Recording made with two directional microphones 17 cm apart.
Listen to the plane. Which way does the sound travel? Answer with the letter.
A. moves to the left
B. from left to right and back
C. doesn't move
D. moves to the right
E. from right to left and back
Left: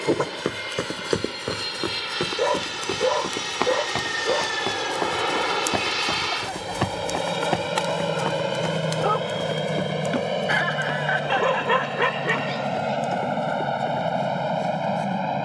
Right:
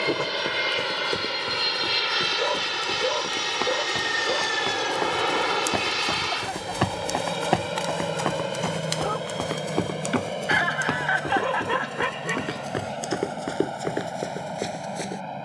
A.